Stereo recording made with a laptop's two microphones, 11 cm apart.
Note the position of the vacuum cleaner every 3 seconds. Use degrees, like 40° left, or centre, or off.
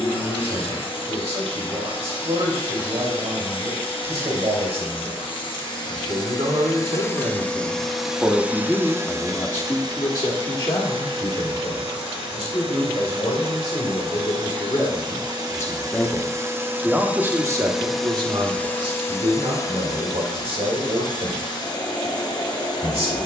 50° left, 50° left, 10° left, 50° right, 60° right, 20° right, 30° left, 40° left.